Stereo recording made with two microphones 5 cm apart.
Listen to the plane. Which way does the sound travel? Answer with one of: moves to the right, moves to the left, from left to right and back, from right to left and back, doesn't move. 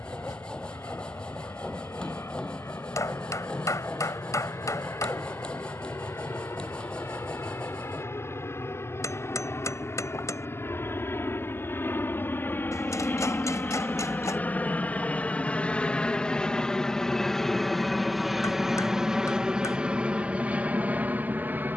moves to the right.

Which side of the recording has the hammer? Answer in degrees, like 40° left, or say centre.
80° left.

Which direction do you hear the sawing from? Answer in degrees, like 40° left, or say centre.
20° left.